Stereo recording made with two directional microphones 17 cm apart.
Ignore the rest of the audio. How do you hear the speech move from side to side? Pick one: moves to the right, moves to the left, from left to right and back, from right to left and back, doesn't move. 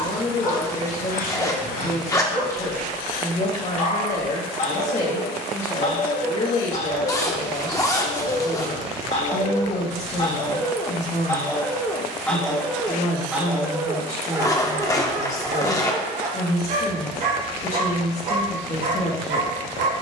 doesn't move.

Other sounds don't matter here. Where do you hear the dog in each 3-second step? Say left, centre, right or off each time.
left, left, left, left, centre, right, right.